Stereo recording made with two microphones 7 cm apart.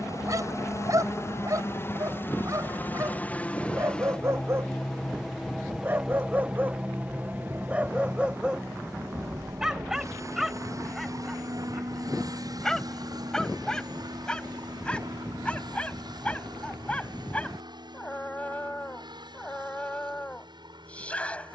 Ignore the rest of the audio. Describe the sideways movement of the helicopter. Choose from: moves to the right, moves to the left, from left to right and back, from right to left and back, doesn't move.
moves to the right.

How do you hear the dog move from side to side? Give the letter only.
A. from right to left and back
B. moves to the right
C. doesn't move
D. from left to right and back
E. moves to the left
E.